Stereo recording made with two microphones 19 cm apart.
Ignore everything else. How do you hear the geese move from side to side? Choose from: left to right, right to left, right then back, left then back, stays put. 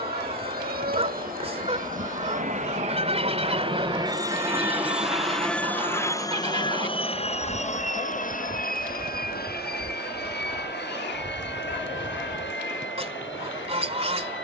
stays put.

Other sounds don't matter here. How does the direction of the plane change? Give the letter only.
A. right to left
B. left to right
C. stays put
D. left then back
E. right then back
A.